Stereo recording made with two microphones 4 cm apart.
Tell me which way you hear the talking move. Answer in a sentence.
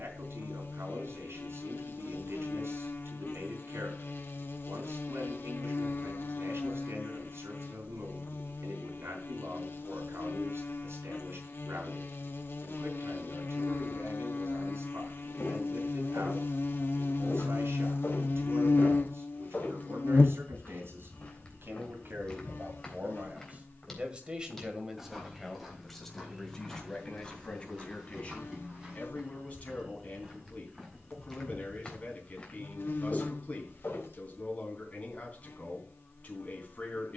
In this clip you hear the talking go from the right side to the left.